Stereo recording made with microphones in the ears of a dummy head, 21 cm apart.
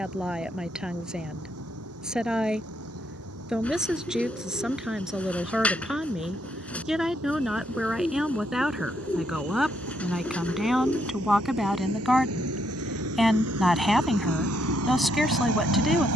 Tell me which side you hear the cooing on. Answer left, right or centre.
centre.